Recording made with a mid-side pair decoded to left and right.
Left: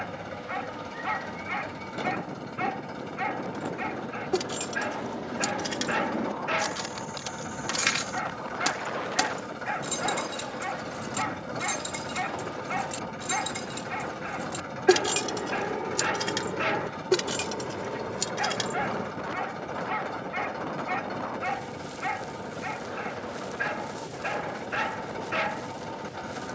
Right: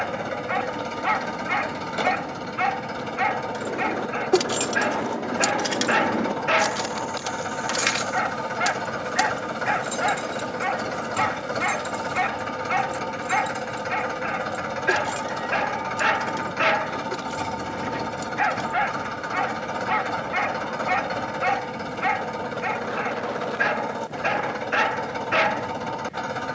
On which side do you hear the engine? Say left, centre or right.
right.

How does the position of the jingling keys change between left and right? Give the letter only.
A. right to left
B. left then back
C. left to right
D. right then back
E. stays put
A.